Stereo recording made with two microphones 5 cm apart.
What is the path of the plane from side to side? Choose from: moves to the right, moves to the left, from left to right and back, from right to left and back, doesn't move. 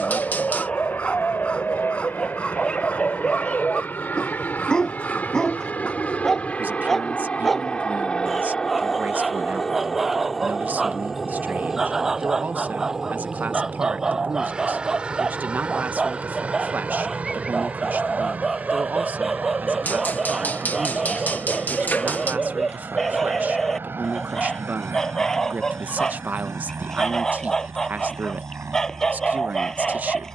moves to the right.